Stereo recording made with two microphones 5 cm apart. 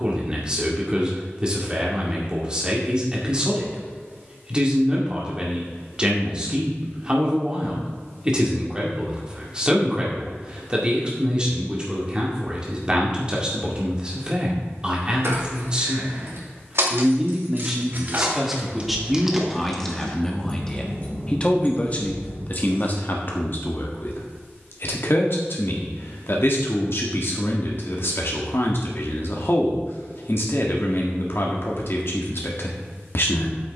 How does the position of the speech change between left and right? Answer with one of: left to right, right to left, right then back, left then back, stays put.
right to left.